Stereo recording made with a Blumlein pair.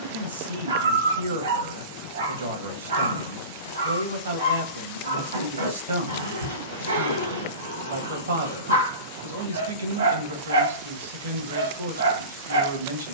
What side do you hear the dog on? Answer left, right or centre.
right.